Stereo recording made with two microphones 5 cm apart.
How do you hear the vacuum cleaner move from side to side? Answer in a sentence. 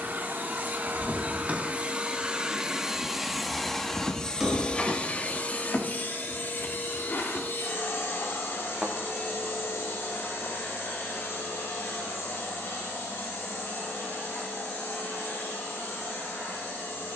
In this clip you hear the vacuum cleaner move to the left.